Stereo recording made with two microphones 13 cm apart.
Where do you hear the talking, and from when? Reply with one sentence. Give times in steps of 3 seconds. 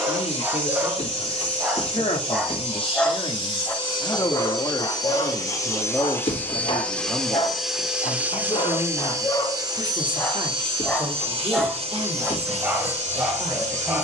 You can hear the talking on the left from 0 s, in the centre from 6 s and on the right from 9 s.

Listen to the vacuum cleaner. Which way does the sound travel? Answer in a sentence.
In this clip you hear the vacuum cleaner move from left to right.